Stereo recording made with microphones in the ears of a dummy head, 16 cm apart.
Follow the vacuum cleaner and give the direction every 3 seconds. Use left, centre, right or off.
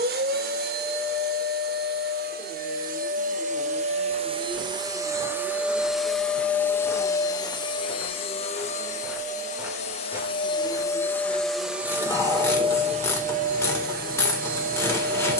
right, right, left, left, right.